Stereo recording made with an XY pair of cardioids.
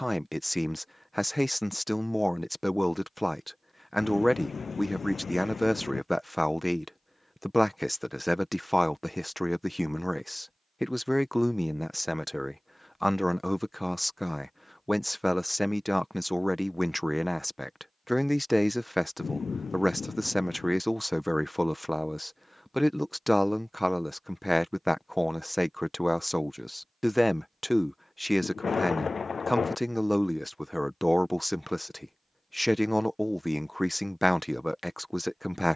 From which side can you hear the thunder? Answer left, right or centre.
left.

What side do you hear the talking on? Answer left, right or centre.
centre.